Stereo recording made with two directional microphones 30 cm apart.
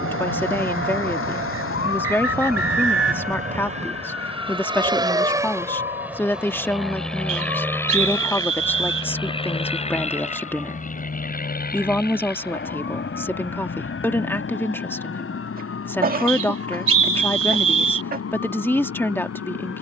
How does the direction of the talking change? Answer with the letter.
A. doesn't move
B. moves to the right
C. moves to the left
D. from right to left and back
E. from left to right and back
A.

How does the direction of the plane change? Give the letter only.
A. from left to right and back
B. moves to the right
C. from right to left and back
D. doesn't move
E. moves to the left
E.